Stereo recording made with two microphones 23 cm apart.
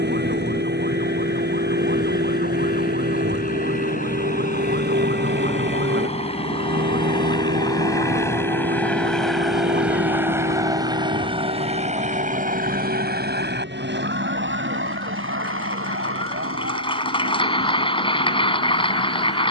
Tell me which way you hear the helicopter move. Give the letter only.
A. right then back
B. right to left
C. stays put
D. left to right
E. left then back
D.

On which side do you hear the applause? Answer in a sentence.
In this clip you hear the applause on the left.